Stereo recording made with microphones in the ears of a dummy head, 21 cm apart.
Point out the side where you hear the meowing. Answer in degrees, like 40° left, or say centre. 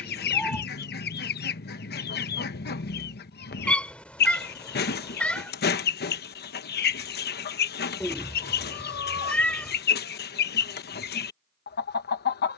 10° left.